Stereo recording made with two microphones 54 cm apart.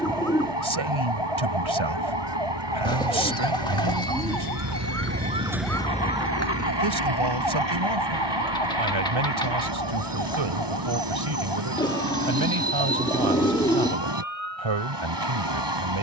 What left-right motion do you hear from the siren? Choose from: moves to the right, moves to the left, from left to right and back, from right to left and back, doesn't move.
moves to the left.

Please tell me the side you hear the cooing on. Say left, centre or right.
centre.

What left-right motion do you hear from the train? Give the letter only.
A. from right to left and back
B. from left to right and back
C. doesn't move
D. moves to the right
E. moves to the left
C.